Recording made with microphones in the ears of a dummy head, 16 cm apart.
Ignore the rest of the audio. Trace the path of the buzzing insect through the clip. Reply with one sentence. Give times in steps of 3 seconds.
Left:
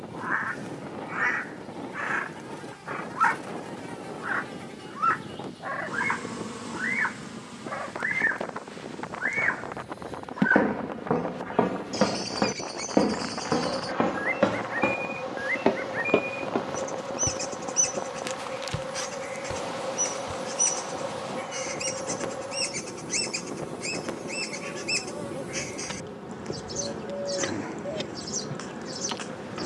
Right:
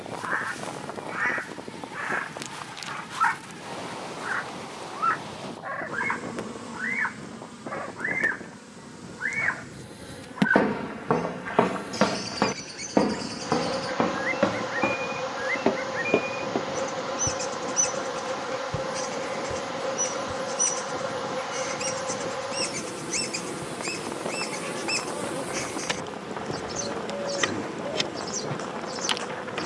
In this clip you hear the buzzing insect on the right from 0 s, in the centre from 3 s and on the right from 9 s.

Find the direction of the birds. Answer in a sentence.
In this clip you hear the birds in the centre.